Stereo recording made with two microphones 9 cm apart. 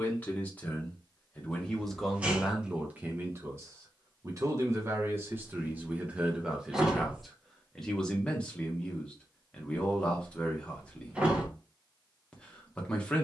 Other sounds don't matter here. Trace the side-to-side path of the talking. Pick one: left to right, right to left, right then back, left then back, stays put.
right then back.